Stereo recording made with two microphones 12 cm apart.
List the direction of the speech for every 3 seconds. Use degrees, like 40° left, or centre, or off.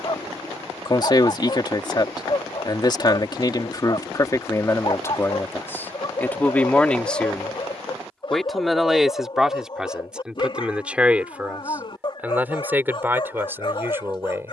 40° left, 30° left, 10° left, 10° right, 20° right.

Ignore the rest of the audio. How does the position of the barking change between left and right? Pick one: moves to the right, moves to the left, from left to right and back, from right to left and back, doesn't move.
doesn't move.